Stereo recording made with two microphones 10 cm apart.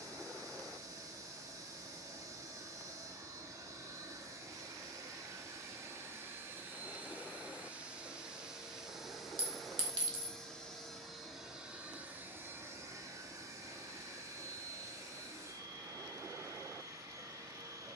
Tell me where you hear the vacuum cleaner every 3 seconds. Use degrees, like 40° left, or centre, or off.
30° right, 30° right, 20° right, centre, 30° right, 30° right.